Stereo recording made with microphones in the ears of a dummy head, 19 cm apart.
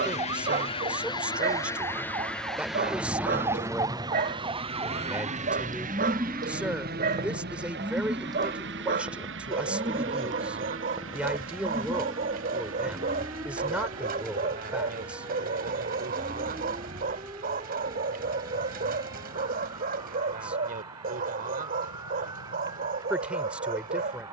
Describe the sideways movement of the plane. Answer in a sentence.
You can hear the plane go from the left side to the right.